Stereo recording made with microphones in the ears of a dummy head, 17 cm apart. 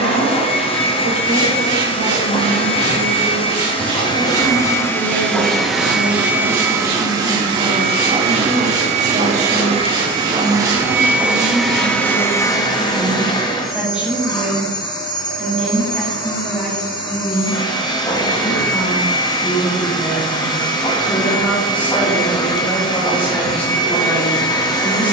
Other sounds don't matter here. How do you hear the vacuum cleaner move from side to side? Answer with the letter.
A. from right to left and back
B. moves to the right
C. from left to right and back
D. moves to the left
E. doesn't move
C.